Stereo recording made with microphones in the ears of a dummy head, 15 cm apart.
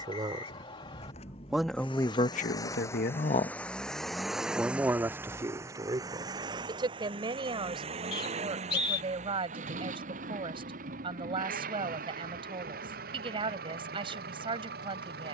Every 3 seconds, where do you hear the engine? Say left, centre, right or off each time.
left, centre, right, right, right.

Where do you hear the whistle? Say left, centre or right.
left.